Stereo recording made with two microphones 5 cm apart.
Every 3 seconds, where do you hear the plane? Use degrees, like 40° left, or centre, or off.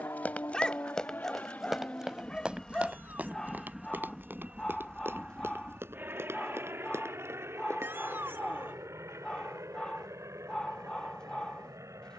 30° left, 20° right, 50° right, 60° right.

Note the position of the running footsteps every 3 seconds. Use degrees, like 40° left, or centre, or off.
10° left, 40° right, 60° right, off.